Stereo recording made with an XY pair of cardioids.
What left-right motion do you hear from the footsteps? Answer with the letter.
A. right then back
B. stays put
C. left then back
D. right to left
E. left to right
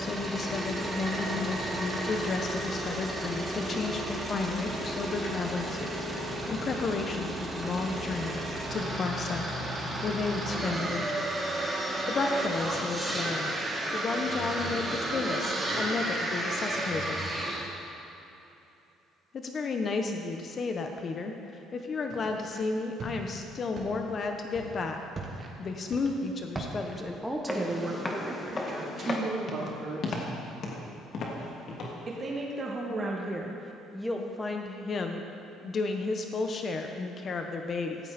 D.